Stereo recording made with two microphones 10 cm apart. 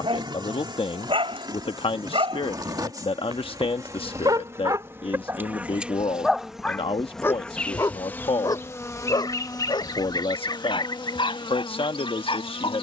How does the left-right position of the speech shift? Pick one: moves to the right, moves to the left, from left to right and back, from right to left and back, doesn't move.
doesn't move.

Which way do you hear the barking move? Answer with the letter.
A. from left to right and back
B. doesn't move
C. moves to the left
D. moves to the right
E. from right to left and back
C.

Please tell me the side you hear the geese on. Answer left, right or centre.
left.